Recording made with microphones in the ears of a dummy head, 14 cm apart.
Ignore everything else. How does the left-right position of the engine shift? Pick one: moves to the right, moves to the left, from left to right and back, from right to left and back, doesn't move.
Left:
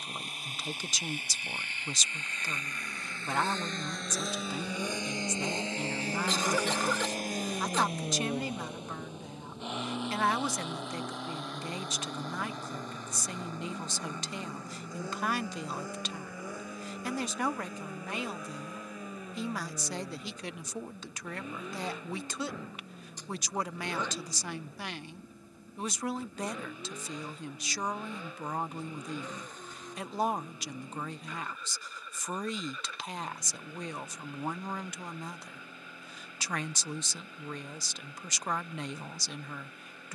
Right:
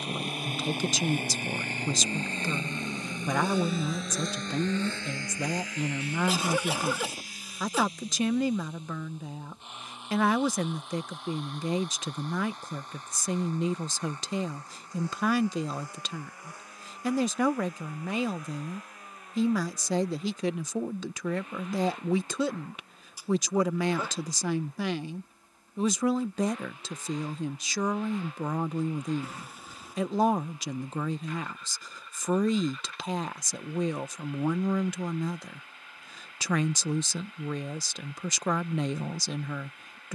moves to the left.